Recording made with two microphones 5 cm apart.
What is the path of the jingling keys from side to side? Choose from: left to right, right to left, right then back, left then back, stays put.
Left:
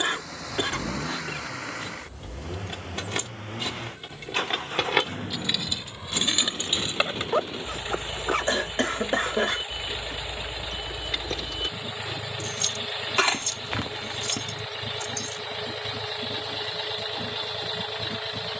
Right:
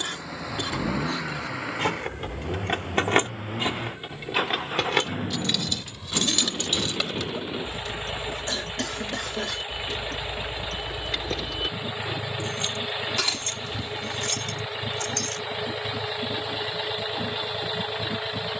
left then back.